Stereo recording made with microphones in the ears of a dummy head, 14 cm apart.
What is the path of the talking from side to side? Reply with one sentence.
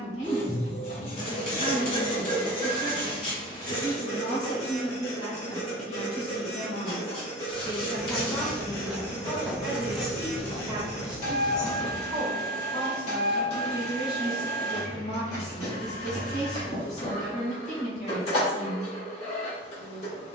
In this clip you hear the talking go right and come back.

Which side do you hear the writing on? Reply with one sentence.
In this clip you hear the writing on the left.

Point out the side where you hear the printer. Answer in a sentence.
You can hear the printer on the left.